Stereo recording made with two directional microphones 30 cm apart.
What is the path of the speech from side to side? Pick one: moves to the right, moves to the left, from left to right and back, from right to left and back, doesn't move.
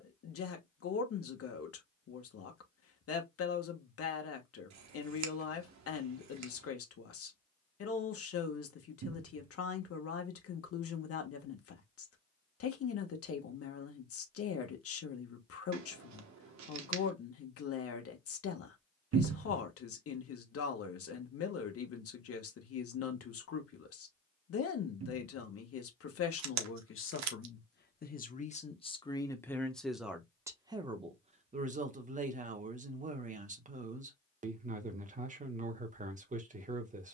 moves to the right.